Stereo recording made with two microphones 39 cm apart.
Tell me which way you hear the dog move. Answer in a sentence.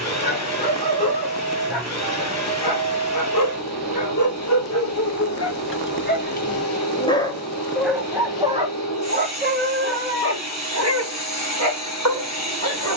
In this clip you hear the dog move to the right.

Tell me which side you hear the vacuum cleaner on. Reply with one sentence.
In this clip you hear the vacuum cleaner on the left.